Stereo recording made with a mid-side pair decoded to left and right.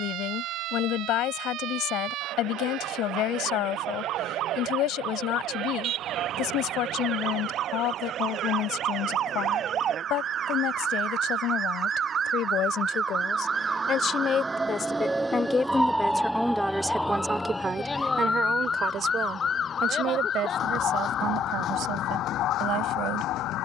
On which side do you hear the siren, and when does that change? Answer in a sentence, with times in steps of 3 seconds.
You can hear the siren on the right from 0 s, in the centre from 15 s and on the left from 18 s.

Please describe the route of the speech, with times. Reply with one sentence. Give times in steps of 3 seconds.
You can hear the speech on the left from 0 s, in the centre from 15 s and on the right from 18 s.